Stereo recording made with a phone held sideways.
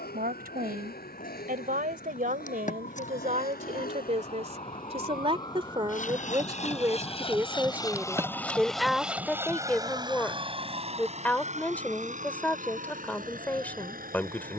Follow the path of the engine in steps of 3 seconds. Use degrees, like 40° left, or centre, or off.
80° left, 60° left, 30° left, 30° right, 60° right.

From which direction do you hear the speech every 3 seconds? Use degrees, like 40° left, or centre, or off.
60° right, 40° right, 10° right, 10° left, 10° left.